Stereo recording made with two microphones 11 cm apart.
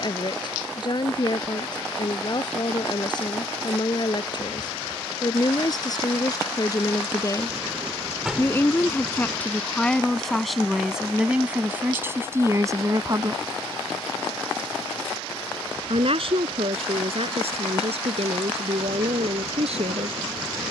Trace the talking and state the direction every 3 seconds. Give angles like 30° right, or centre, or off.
40° left, 40° left, 30° left, centre, 30° right, 70° right, 80° right.